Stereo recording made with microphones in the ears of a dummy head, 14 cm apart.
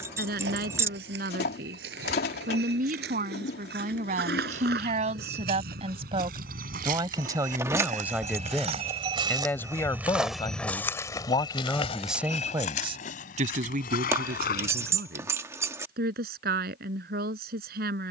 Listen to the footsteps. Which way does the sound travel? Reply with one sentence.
You can hear the footsteps move from right to left.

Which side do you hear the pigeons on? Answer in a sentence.
You can hear the pigeons on the left.